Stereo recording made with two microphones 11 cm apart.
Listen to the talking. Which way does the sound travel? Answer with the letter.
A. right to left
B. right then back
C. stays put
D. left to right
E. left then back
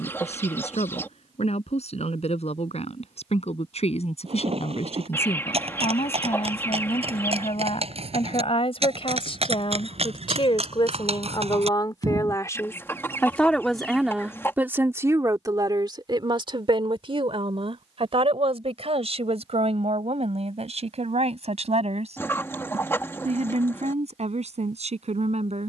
D.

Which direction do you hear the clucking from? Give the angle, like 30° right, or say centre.
20° left.